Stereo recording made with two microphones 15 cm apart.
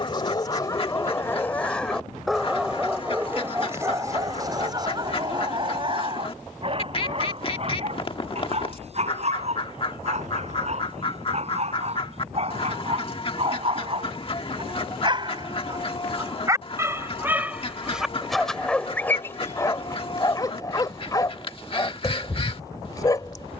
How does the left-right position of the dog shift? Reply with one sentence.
You can hear the dog go right and come back.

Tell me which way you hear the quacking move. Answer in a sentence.
In this clip you hear the quacking stay put.